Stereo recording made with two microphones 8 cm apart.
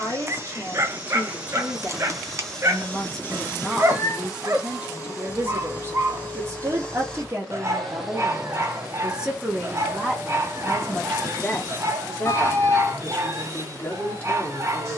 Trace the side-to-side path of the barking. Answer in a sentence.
You can hear the barking stay in one place.